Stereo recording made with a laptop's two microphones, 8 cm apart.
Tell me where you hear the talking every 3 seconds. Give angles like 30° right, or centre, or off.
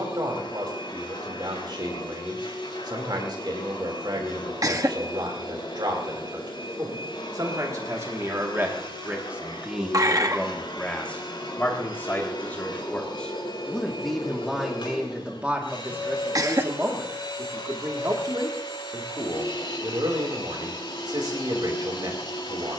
60° right, 60° right, 40° right, centre, 10° left, 30° right, 50° right, 60° right.